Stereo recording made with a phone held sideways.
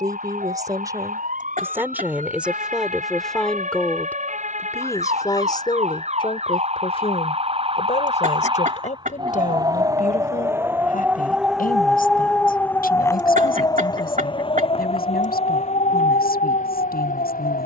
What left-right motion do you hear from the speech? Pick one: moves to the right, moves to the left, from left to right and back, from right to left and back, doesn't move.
moves to the left.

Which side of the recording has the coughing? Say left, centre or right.
right.